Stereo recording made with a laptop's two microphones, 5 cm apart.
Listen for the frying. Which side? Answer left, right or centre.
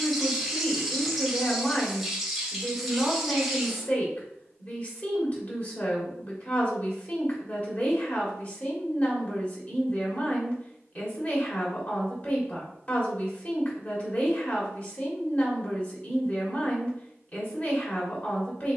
centre.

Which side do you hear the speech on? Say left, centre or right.
left.